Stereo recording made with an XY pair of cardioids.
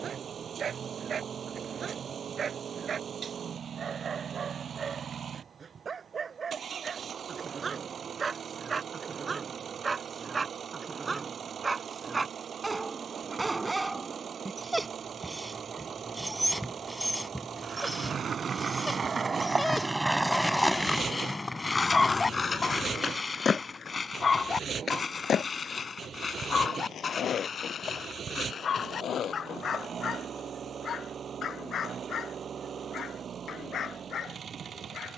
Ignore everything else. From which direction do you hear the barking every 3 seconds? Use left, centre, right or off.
right, right, right, right, right, centre, centre, left, left, left, left, left.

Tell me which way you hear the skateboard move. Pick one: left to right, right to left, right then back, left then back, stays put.
right to left.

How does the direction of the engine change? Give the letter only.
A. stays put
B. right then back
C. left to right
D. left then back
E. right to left
A.